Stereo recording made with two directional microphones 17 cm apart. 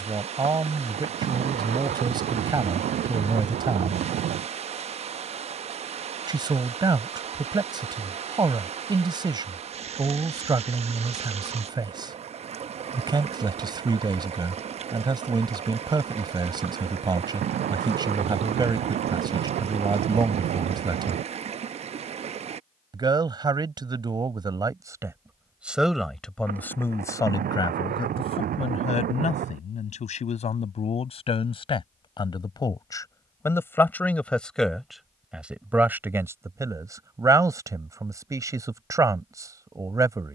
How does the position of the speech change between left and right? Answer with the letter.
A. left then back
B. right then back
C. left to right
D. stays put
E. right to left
A.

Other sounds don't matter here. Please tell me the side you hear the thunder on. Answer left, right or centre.
right.